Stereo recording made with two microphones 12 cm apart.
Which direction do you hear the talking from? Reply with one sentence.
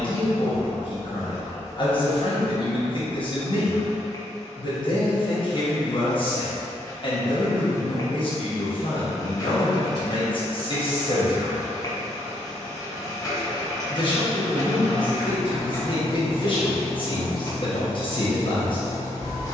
In this clip you hear the talking on the left.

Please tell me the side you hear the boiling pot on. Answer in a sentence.
You can hear the boiling pot on the left.